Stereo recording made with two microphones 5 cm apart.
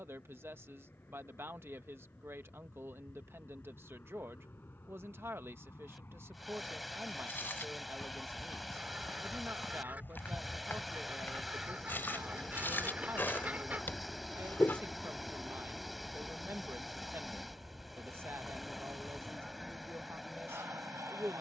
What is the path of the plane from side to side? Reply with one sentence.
In this clip you hear the plane travel towards the right.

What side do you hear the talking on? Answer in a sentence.
In this clip you hear the talking on the right.